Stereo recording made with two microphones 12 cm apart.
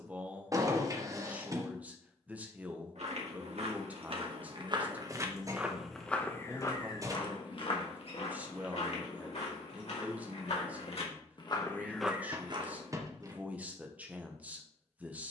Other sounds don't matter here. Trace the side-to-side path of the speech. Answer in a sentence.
In this clip you hear the speech stay in one place.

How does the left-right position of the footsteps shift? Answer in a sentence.
You can hear the footsteps move from right to left and back again.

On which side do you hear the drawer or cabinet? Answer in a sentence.
In this clip you hear the drawer or cabinet on the right.